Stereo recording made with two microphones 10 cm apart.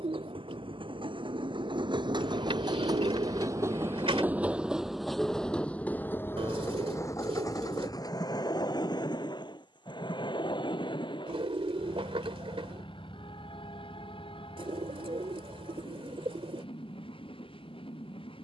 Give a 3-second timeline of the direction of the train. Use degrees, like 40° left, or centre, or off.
60° right, 10° right, 40° left, 50° left, 60° left, 70° left.